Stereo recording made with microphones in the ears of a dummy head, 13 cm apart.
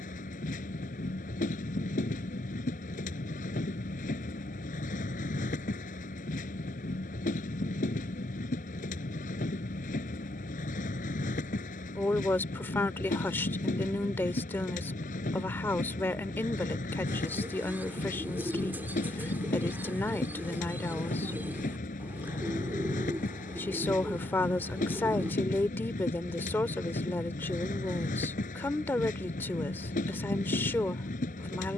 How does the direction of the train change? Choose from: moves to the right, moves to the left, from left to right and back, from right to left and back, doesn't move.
doesn't move.